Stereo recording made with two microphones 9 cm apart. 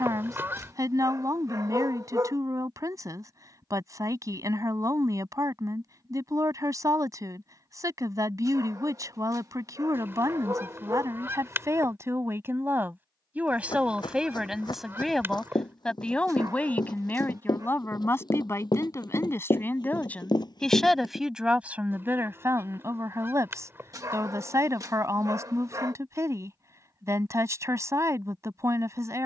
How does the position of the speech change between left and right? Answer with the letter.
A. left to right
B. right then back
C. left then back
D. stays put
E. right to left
C.